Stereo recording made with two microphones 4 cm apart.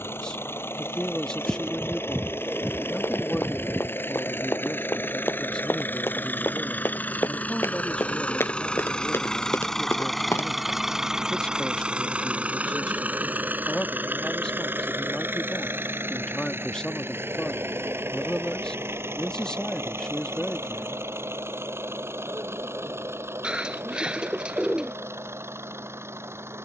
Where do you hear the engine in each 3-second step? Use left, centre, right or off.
left, left, left, centre, right, right, right, right, right.